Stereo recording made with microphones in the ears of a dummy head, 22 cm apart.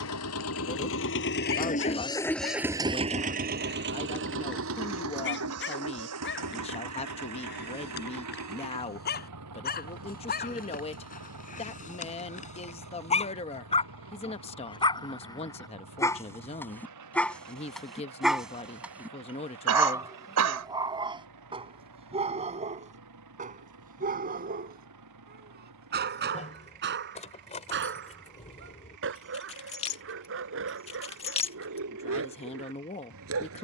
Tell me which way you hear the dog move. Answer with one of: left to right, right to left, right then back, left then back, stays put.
left to right.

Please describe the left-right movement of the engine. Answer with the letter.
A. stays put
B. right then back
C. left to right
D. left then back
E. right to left
C.